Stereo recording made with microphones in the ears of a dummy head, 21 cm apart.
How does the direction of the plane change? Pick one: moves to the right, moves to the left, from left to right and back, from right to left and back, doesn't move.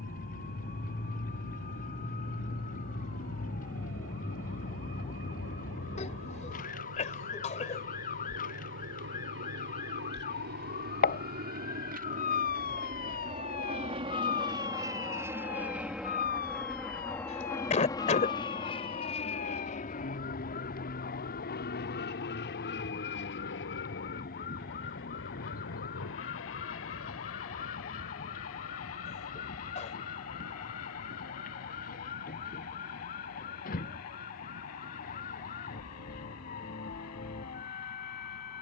moves to the left.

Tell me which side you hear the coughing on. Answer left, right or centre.
left.